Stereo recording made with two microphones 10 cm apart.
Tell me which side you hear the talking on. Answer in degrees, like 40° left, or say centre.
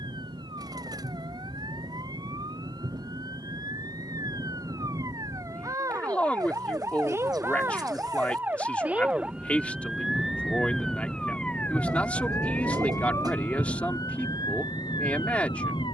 10° left.